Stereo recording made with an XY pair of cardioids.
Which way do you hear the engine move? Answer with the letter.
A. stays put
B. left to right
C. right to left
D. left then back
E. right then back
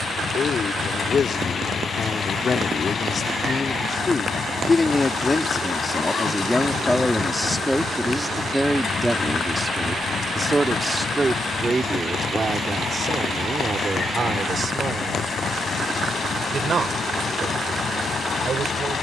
A.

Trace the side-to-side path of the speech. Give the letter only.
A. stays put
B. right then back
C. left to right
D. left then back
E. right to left
C.